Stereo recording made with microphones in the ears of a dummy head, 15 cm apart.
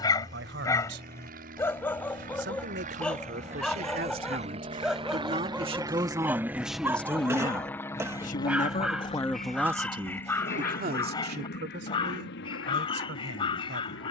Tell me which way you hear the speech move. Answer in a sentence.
You can hear the speech go left and come back.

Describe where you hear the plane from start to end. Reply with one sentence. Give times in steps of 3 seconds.
You can hear the plane on the right from 0 s, in the centre from 6 s and on the left from 9 s.